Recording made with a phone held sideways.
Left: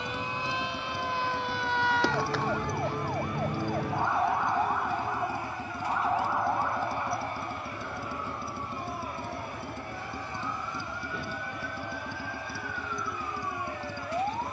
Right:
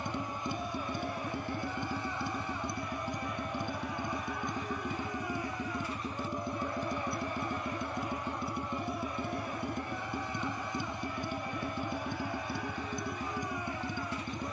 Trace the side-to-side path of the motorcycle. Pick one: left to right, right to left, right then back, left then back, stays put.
stays put.